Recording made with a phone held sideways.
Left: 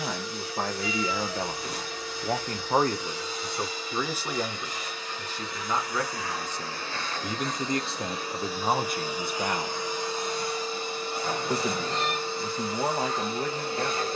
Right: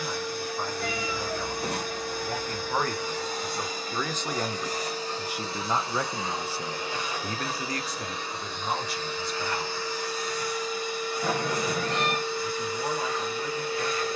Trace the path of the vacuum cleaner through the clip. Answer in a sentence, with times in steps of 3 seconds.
In this clip you hear the vacuum cleaner on the right from 0 s, in the centre from 6 s and on the left from 9 s.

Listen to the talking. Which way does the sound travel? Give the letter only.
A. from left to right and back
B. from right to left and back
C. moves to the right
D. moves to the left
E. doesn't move
A.